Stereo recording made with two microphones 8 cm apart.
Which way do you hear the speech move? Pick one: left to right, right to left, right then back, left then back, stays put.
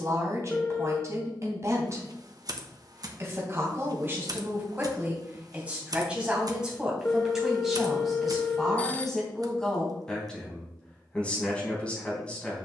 right to left.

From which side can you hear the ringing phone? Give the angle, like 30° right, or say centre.
20° left.